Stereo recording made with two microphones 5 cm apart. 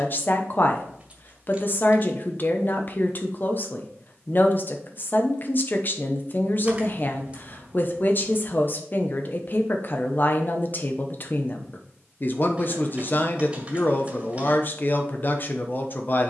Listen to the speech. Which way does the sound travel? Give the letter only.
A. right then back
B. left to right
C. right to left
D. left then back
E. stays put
E.